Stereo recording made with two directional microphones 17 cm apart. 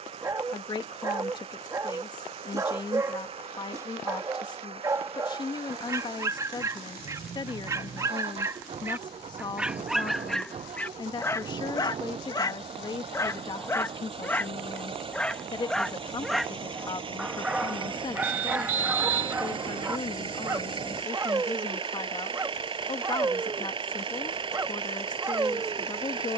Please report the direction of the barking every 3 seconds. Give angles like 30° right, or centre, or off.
20° right, 20° right, 20° right, 10° left, 20° left, centre, 10° right, 20° right, 20° right.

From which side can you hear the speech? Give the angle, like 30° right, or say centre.
30° left.